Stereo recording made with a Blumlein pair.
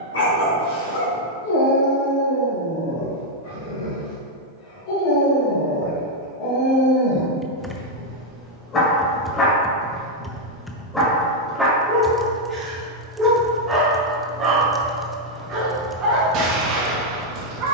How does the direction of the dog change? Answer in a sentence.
You can hear the dog move to the right.